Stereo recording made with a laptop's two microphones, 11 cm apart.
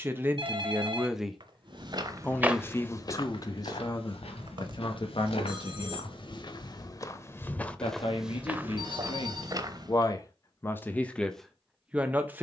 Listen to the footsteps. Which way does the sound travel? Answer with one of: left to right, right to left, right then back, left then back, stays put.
left then back.